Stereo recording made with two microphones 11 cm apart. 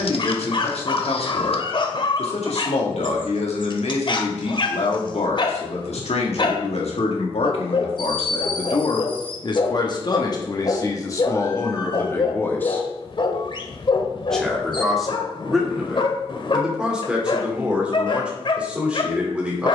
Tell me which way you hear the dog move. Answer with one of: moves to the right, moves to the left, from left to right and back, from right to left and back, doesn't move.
doesn't move.